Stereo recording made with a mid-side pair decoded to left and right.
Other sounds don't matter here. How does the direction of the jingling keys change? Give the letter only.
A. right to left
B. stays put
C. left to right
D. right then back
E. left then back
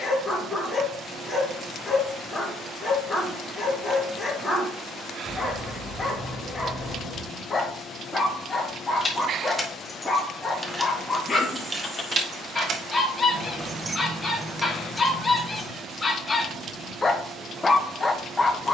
D.